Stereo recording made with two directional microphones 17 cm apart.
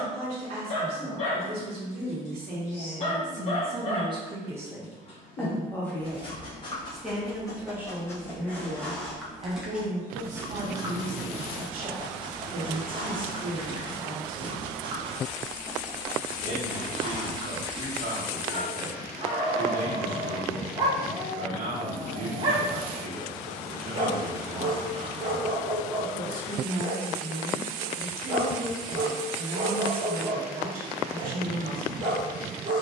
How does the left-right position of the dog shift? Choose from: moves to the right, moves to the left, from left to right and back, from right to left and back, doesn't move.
moves to the right.